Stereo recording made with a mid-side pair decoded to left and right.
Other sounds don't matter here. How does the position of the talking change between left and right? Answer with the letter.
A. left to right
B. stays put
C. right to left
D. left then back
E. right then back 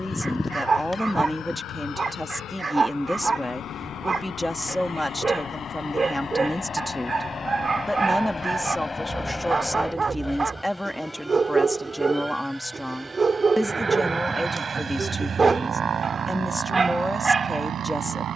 B.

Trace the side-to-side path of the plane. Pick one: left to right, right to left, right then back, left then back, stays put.
left to right.